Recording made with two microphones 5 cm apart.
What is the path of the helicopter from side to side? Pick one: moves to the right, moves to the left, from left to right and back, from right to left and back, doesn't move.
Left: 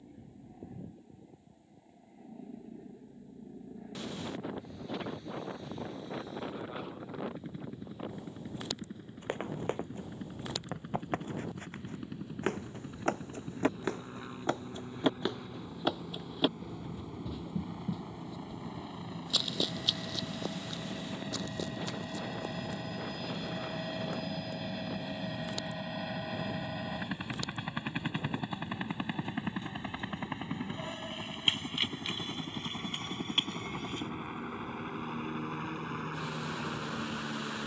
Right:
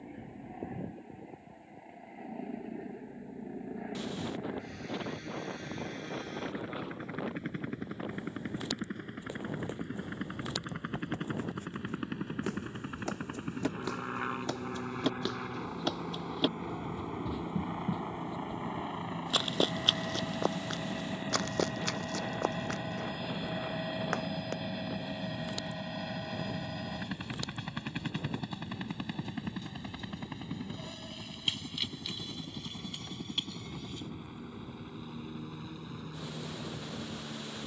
moves to the left.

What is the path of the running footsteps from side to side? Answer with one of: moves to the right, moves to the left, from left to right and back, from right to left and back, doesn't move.
moves to the right.